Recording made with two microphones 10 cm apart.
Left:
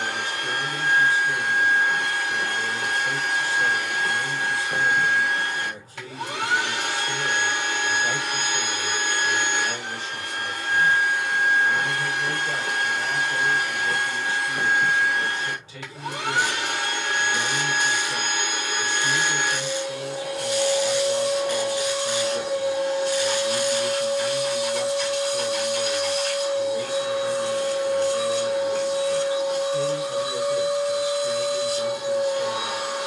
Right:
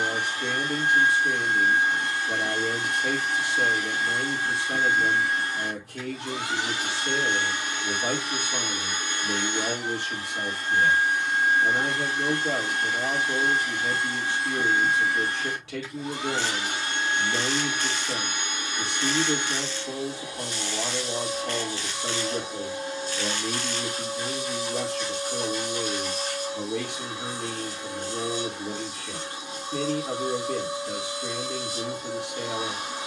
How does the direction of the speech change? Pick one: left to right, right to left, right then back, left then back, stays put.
stays put.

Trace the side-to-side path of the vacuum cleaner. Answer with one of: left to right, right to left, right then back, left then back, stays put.
stays put.